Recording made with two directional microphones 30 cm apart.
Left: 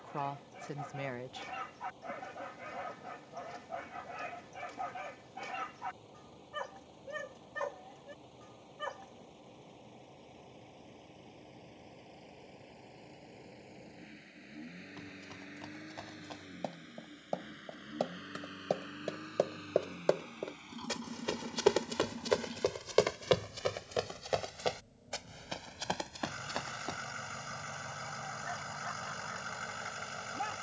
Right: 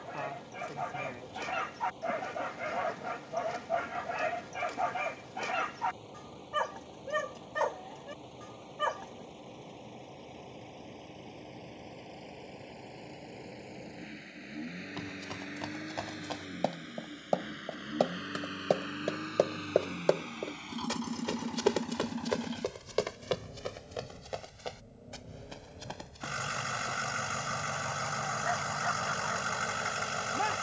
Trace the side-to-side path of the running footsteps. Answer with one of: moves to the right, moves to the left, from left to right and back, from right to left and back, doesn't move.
moves to the left.